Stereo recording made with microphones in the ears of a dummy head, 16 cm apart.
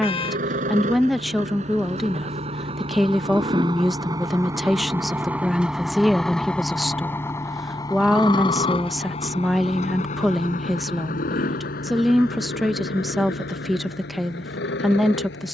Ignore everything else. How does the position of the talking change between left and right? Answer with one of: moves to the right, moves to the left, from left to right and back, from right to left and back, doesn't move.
doesn't move.